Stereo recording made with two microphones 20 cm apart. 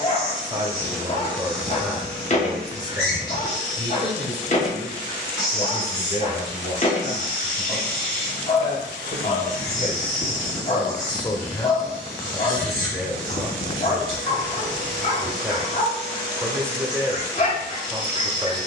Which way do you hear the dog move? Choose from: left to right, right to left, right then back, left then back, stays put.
stays put.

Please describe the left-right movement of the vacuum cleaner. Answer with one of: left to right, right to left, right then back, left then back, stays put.
stays put.